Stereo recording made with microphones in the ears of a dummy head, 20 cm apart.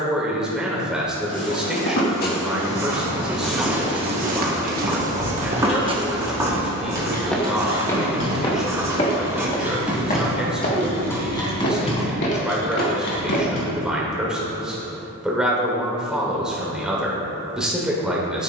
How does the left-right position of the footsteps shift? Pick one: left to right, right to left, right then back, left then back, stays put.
right then back.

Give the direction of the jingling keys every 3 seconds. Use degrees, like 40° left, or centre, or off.
off, 40° left, 20° right, centre, 40° left, off.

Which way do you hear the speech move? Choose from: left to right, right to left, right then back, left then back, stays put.
stays put.